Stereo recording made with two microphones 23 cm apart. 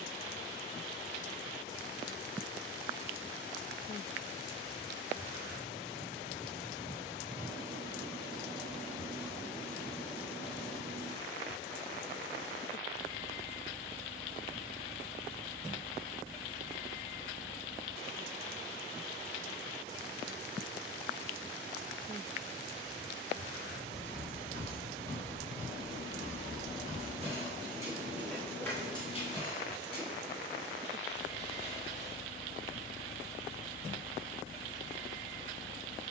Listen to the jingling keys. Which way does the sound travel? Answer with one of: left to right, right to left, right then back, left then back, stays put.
right then back.